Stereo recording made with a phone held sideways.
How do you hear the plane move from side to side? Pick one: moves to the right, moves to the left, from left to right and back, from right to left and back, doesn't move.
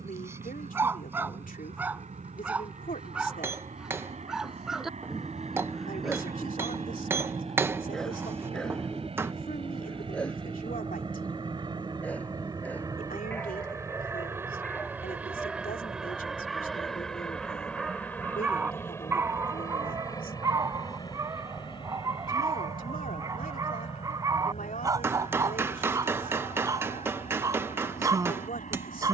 moves to the left.